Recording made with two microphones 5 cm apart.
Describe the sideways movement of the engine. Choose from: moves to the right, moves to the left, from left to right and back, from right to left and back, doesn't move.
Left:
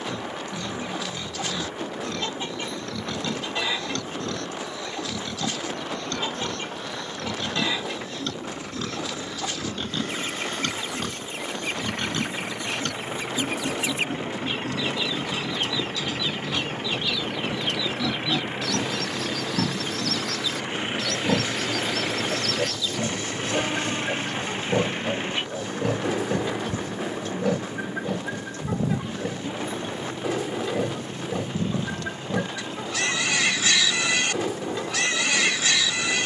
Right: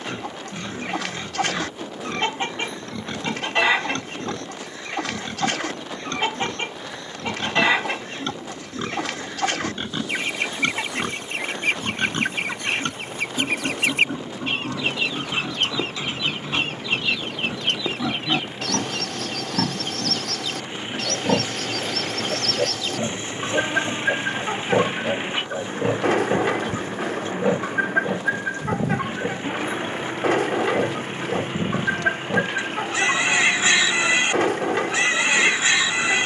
moves to the right.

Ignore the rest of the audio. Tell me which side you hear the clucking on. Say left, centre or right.
right.